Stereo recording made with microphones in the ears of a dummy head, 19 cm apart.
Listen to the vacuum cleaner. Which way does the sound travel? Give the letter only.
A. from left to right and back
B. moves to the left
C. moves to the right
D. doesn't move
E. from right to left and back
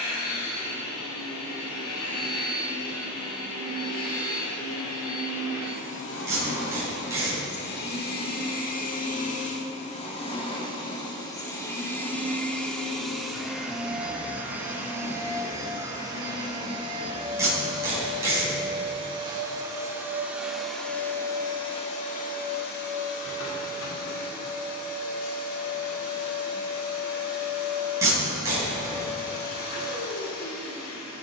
A.